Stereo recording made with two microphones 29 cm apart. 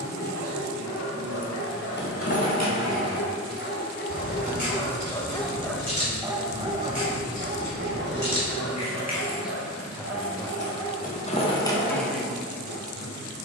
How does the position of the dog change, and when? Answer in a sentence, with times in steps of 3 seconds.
In this clip you hear the dog on the left from 0 s and on the right from 6 s.